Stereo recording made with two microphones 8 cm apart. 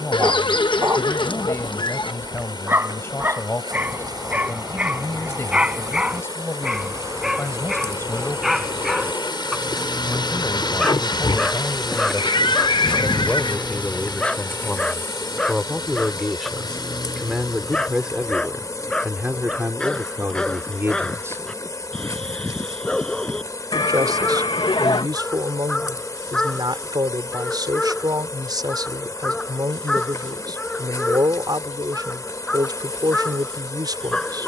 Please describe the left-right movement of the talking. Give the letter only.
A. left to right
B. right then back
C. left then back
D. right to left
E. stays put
A.